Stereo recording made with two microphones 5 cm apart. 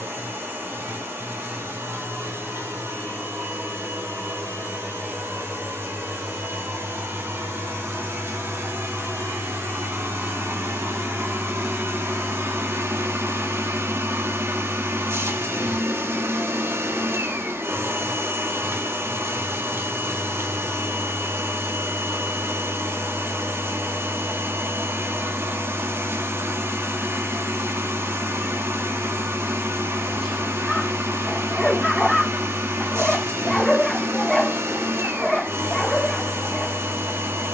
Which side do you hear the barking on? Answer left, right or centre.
centre.